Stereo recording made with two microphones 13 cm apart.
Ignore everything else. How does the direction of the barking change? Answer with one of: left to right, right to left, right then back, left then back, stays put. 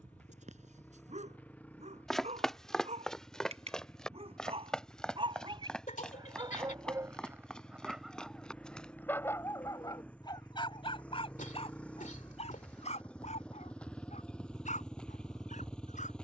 right to left.